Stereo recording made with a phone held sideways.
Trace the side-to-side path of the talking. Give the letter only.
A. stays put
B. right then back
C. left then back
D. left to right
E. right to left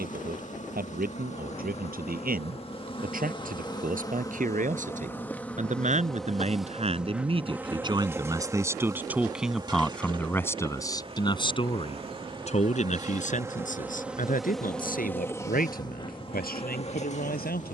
E.